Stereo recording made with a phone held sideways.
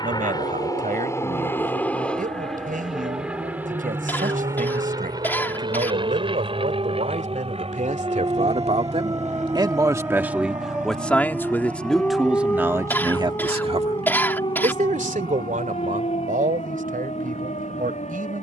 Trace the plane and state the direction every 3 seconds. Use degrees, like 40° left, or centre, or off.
20° left, 20° right, 40° right, 60° right, 60° right, 70° right.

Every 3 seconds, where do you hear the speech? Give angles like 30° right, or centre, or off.
80° right, 80° right, 70° right, 10° right, 30° right, 80° right.